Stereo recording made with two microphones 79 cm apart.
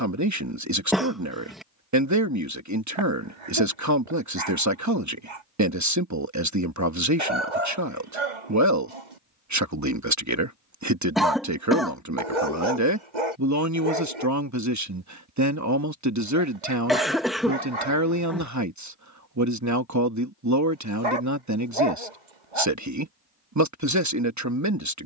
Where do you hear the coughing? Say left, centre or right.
centre.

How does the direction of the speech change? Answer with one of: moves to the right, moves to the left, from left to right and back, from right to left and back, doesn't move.
doesn't move.